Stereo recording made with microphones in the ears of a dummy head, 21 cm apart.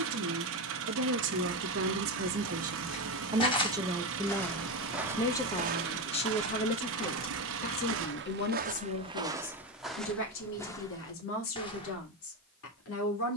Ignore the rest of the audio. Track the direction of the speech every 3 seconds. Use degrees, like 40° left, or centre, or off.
50° right, centre, 40° left, 60° left, 60° left.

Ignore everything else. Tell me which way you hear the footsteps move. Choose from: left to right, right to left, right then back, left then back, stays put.
right then back.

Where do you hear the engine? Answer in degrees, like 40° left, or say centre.
60° right.